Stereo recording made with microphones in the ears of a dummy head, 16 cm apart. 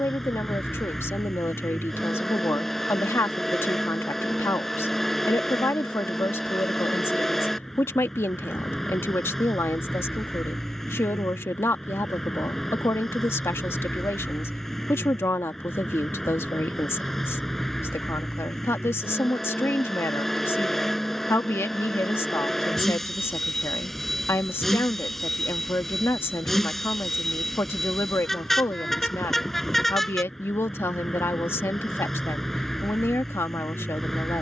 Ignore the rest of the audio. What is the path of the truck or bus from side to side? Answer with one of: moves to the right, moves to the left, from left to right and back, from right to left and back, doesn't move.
doesn't move.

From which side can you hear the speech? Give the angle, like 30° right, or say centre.
10° left.